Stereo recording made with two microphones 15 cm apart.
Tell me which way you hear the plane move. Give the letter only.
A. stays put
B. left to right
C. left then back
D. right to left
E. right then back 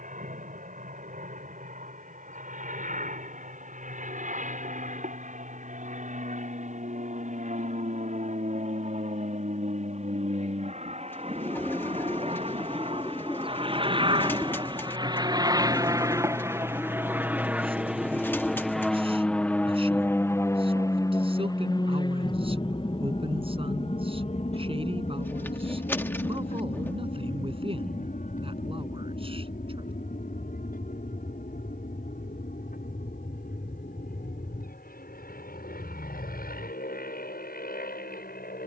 D.